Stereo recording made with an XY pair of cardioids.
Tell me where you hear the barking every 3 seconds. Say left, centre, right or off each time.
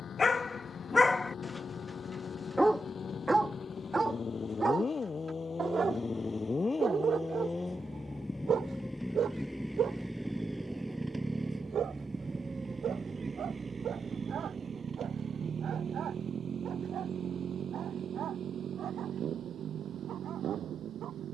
centre, right, right, right, right, right, right.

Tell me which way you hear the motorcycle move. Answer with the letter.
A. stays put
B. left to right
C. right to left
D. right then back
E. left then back
B.